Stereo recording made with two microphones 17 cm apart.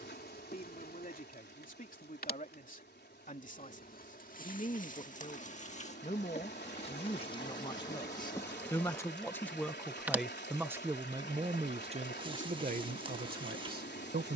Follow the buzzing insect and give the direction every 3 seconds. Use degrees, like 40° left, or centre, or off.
60° left, 50° left, 30° left, 20° right, 30° right.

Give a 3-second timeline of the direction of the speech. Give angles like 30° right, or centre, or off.
50° left, 50° left, 30° left, 10° right, 50° right.